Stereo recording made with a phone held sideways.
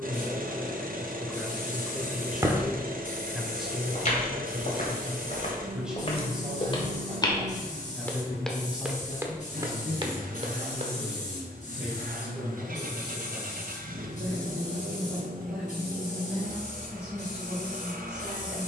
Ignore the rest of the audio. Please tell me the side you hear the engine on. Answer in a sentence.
You can hear the engine on the right.